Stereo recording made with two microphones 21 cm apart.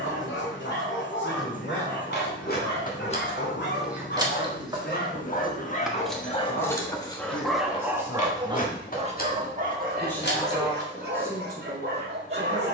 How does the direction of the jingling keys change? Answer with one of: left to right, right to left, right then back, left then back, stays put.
right then back.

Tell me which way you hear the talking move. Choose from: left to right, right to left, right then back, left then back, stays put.
left to right.